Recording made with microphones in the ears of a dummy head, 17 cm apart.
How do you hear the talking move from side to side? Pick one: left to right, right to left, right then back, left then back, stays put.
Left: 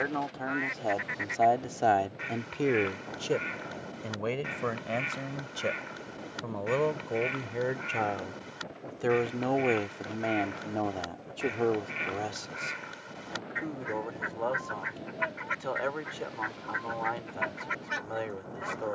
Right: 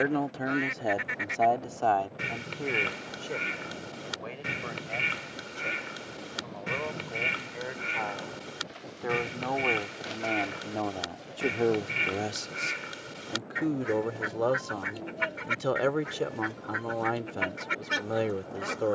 left then back.